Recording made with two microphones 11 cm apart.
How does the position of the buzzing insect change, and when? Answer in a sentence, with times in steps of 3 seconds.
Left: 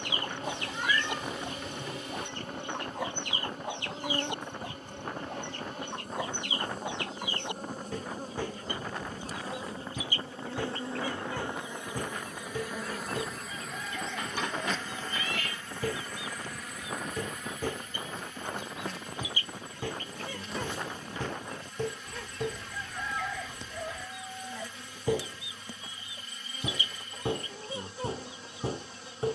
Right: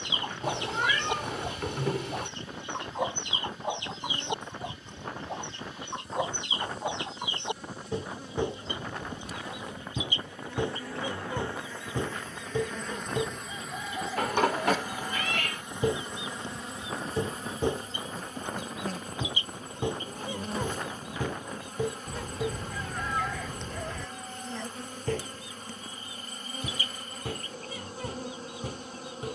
You can hear the buzzing insect on the left from 0 s, in the centre from 12 s and on the right from 15 s.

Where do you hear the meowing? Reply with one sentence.
In this clip you hear the meowing on the right.